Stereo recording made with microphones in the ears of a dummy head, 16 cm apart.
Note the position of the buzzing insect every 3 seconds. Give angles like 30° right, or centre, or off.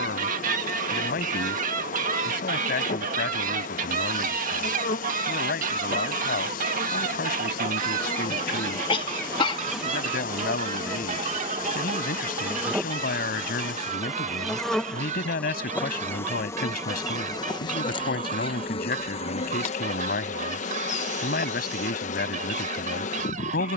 40° left, 40° left, 30° left, 10° right, centre, 10° left, 30° left, 40° left.